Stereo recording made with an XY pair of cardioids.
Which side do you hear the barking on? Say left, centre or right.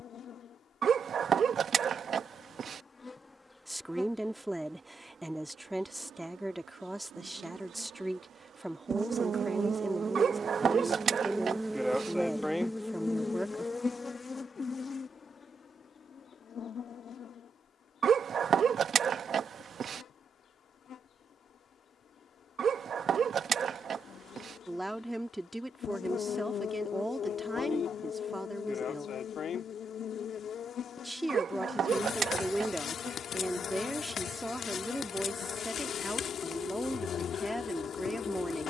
right.